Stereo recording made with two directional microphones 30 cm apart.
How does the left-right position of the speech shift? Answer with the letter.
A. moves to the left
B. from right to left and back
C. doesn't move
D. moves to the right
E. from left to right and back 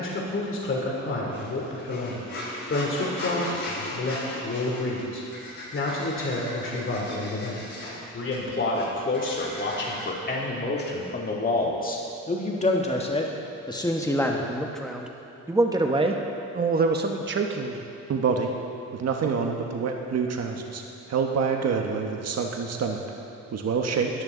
D.